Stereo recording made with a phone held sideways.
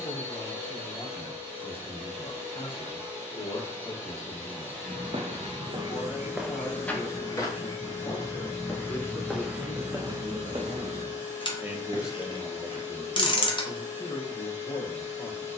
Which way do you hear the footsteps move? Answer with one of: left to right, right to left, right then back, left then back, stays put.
left then back.